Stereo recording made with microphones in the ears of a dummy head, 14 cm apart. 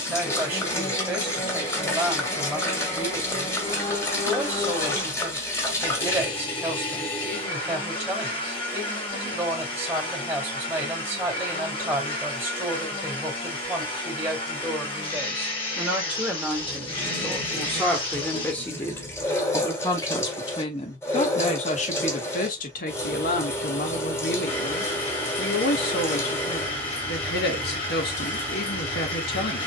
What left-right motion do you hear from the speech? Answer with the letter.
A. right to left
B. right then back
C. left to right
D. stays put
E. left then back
A.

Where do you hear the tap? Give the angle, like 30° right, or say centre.
20° left.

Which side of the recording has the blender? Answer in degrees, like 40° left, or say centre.
30° left.